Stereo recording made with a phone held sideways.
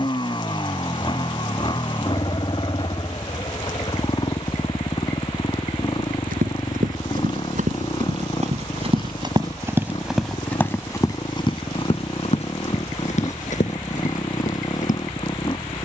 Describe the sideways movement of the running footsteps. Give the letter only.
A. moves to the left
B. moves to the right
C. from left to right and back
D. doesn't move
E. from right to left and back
A.